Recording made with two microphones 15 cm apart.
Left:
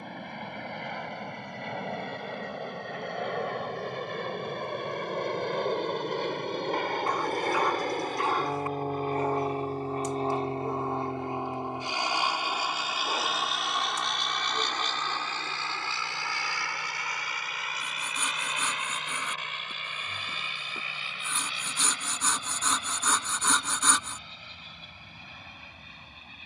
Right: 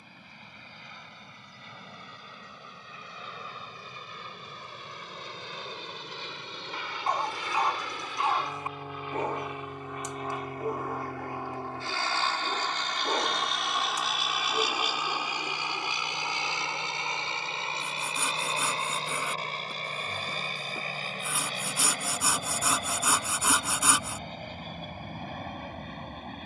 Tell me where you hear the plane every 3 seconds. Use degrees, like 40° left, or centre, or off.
80° left, 70° left, 50° left, 30° left, centre, 20° right, 30° right, 40° right, 50° right.